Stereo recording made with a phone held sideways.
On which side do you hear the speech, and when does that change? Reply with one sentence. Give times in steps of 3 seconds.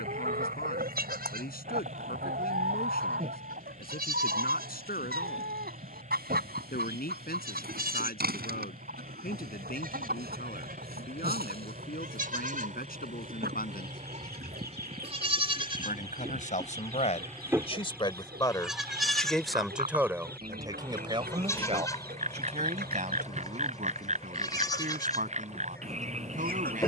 You can hear the speech on the left from 0 s, in the centre from 18 s and on the right from 21 s.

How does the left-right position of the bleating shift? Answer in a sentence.
In this clip you hear the bleating move to the left.